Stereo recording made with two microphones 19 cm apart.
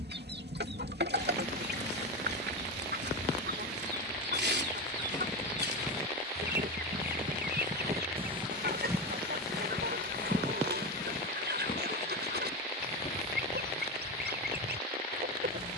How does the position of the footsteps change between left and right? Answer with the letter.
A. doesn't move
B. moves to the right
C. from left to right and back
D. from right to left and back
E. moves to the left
C.